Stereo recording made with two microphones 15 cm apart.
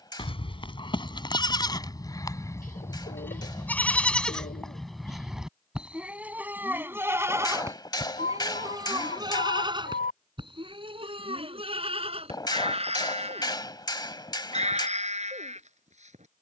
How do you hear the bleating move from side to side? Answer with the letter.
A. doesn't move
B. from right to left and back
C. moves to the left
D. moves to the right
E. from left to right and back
D.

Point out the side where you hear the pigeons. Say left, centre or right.
left.